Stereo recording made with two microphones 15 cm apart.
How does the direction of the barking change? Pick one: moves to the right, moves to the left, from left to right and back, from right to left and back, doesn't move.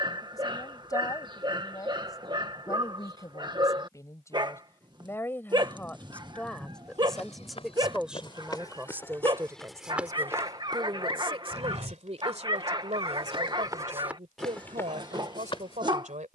doesn't move.